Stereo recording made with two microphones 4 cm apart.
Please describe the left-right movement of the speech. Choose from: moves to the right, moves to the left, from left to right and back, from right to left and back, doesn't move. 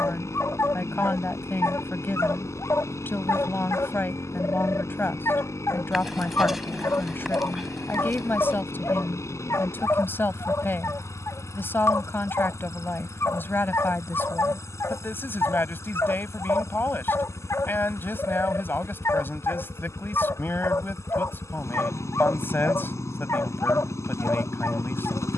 doesn't move.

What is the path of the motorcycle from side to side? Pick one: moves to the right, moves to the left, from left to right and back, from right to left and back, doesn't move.
doesn't move.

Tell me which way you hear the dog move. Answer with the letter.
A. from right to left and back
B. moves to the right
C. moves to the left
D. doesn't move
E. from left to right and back
D.